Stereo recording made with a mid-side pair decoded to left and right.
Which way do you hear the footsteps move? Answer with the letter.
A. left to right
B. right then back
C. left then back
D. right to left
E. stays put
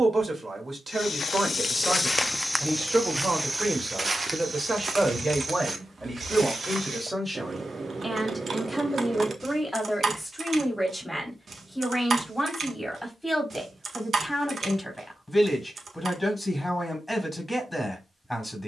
A.